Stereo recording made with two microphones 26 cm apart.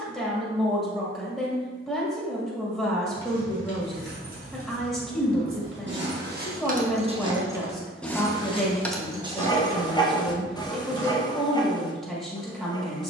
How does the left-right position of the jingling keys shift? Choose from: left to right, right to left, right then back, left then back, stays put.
left then back.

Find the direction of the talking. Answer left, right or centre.
centre.